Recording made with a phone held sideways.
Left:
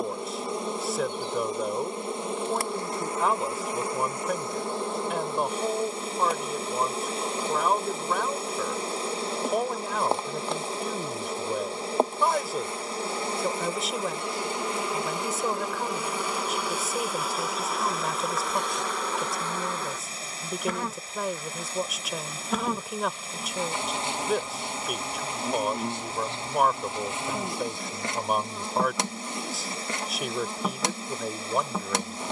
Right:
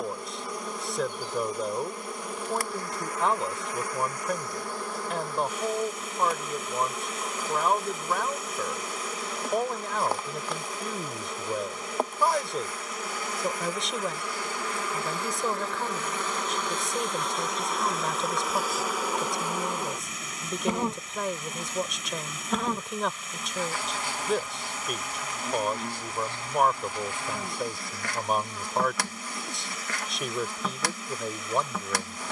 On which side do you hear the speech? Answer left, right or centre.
centre.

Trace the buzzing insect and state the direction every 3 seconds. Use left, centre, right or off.
left, left, left, left, left, centre, centre, centre, left, left, left.